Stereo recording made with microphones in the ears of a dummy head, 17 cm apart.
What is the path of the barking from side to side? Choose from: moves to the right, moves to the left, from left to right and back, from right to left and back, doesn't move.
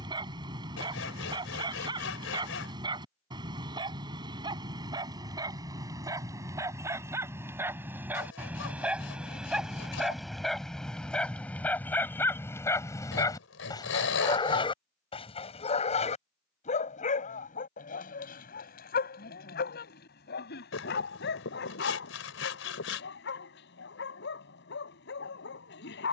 moves to the left.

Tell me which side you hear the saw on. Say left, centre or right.
left.